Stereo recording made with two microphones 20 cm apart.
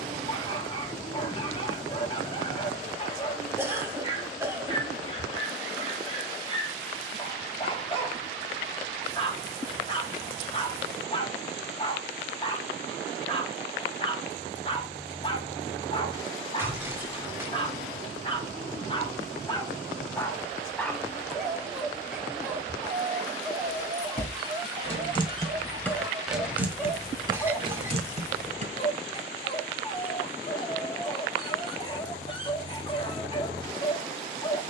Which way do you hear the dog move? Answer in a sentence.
In this clip you hear the dog go right and come back.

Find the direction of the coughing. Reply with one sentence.
You can hear the coughing in the centre.